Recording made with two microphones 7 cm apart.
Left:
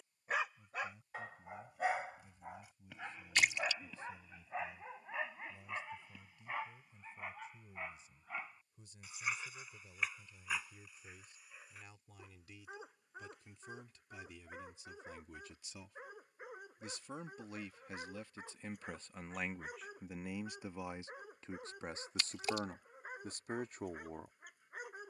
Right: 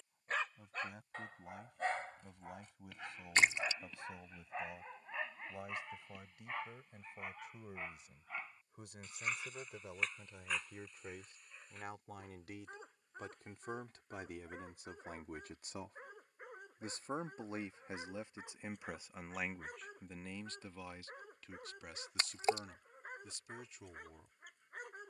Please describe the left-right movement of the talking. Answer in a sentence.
You can hear the talking move to the left.